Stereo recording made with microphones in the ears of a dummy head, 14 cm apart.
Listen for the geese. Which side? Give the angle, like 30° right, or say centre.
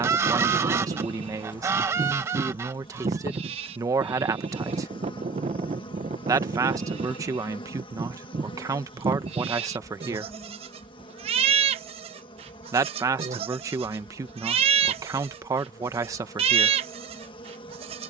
20° right.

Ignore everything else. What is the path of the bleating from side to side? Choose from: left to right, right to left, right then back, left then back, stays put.
stays put.